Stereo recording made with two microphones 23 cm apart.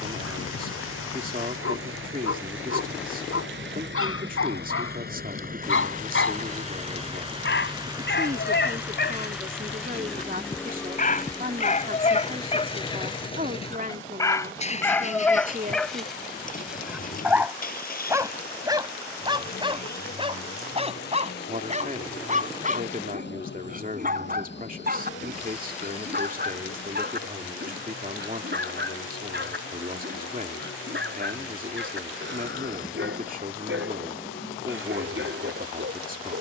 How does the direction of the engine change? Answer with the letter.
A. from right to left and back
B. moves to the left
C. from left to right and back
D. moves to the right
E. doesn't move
B.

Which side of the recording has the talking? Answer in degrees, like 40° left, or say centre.
40° right.